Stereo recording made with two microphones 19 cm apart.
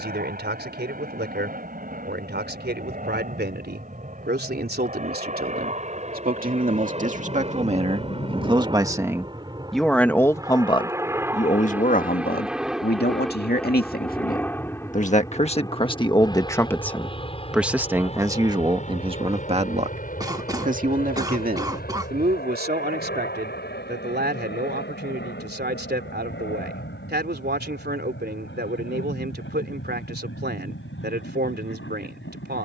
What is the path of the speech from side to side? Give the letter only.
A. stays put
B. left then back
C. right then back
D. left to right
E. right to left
B.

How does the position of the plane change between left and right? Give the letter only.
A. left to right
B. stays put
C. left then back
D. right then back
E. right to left
E.